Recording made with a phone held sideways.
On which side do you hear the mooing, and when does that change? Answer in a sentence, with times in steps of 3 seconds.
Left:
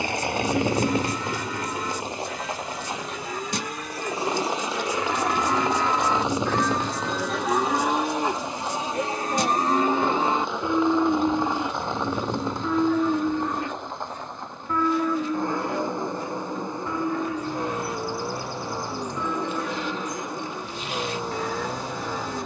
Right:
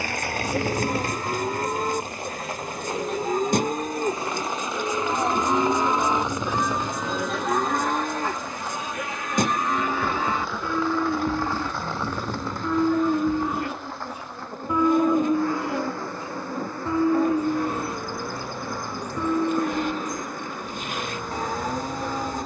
You can hear the mooing on the right from 0 s, in the centre from 6 s, on the left from 9 s, in the centre from 12 s and on the right from 15 s.